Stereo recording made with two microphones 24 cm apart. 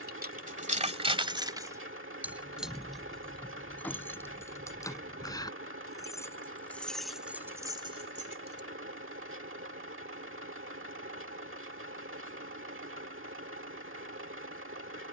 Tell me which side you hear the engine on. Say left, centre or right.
right.